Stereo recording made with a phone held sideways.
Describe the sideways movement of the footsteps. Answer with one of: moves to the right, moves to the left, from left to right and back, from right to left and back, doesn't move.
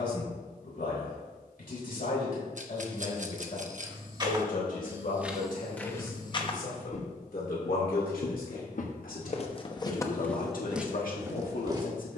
from right to left and back.